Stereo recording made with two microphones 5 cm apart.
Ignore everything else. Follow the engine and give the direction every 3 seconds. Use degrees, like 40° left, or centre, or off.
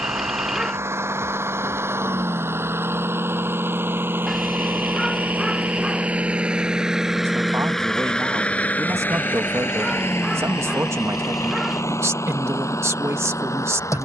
60° right, 40° right, centre, 60° left, 80° left.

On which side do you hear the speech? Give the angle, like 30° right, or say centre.
70° right.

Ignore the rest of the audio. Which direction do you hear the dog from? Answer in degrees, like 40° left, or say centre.
10° right.